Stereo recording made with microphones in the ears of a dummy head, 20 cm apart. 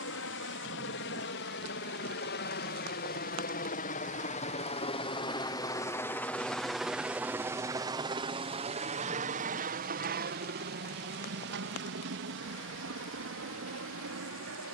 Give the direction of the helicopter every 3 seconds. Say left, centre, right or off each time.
left, left, centre, right, right.